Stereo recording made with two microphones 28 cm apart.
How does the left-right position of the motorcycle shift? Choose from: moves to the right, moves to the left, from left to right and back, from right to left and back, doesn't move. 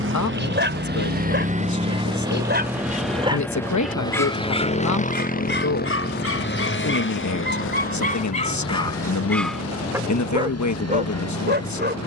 moves to the left.